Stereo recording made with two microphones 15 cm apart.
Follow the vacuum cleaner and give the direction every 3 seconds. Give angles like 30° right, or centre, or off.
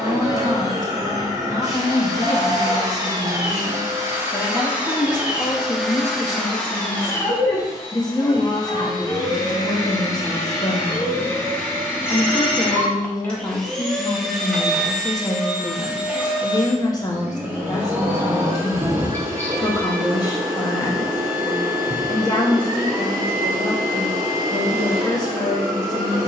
30° right, 10° right, 20° left, 20° left, 10° left, 10° right, 20° right, 20° right, 20° right.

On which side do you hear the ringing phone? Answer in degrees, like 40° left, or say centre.
10° left.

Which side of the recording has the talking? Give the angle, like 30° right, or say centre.
30° left.